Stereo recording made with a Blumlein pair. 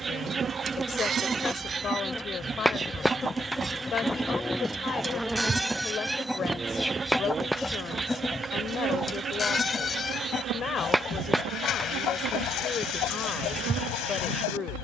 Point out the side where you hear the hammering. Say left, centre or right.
centre.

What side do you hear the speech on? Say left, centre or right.
left.